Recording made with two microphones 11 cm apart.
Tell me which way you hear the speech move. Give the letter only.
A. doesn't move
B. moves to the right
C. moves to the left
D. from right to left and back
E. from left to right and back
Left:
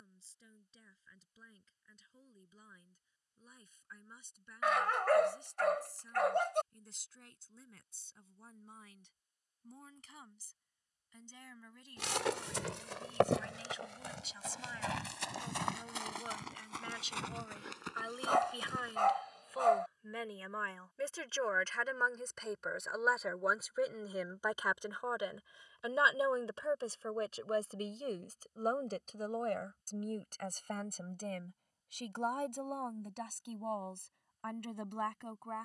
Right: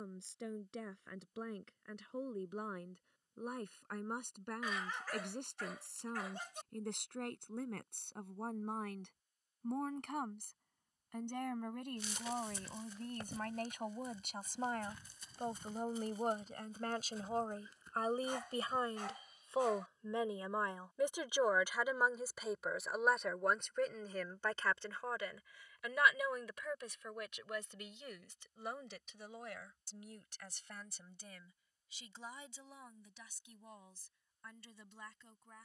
C.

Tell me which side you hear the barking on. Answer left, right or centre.
left.